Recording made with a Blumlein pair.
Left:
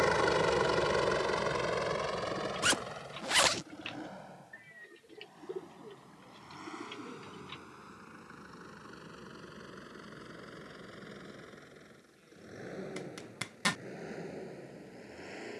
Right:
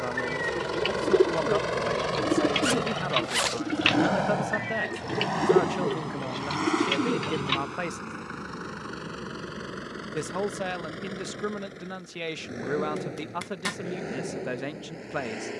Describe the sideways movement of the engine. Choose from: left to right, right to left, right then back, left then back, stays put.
left to right.